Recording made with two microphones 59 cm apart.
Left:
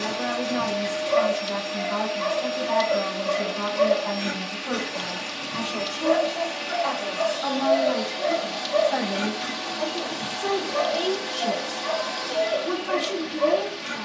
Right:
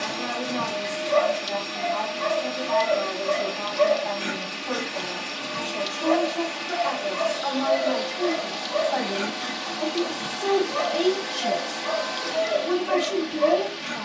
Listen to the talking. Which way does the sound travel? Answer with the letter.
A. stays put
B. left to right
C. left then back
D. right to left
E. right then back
B.